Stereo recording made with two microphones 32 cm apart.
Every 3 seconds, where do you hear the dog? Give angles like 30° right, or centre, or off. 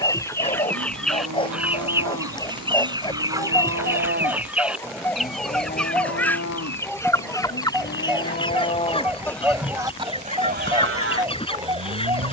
10° left, 10° left, centre, 10° right.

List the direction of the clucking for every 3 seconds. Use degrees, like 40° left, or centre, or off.
centre, centre, 10° left, 20° left.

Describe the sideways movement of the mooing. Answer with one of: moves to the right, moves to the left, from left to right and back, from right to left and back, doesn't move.
from right to left and back.